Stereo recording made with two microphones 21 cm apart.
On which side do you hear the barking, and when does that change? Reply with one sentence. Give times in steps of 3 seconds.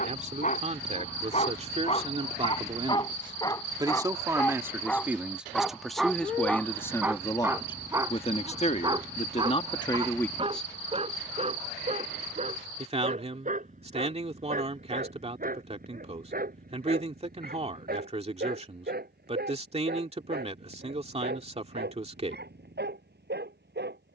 You can hear the barking on the left from 0 s, in the centre from 3 s and on the right from 9 s.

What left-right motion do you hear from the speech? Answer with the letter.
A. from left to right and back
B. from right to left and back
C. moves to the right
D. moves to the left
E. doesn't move
B.